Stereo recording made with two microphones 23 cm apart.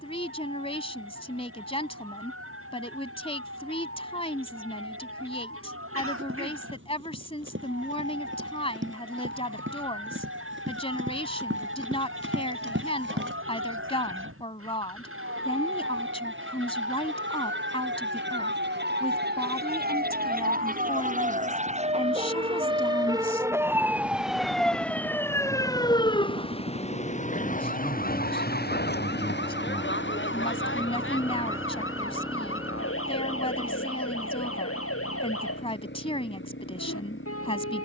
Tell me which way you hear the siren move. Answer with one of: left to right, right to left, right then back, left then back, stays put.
right to left.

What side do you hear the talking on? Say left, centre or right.
left.